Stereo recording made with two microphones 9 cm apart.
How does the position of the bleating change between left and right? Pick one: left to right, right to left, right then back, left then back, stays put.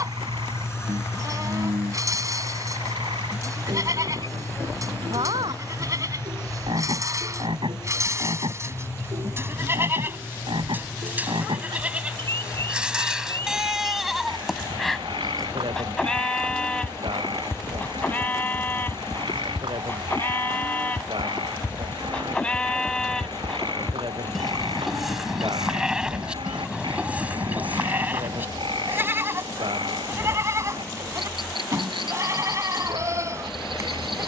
left then back.